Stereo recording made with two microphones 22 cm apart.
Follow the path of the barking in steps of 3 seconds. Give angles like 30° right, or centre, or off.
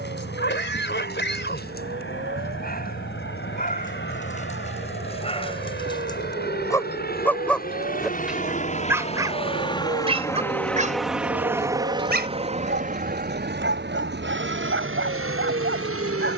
40° left, 30° left, 10° left, 20° right, 60° right, 60° right.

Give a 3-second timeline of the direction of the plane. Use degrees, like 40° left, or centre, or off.
60° left, 60° left, 40° left, 10° left, 40° right, 60° right.